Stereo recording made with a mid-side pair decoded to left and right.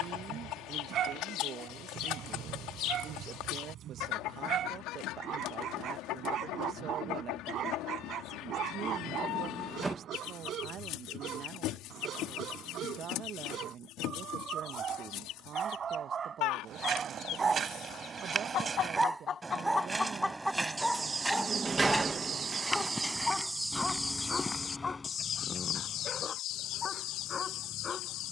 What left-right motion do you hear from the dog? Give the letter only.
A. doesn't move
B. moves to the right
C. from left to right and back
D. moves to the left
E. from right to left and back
D.